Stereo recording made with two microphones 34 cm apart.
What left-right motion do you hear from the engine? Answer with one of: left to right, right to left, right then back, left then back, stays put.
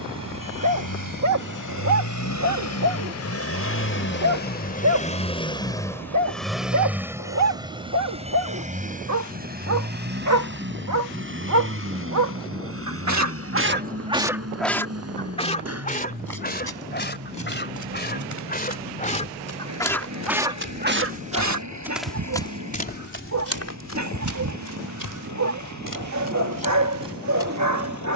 left to right.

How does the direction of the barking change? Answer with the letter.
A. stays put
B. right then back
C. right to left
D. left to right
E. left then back
E.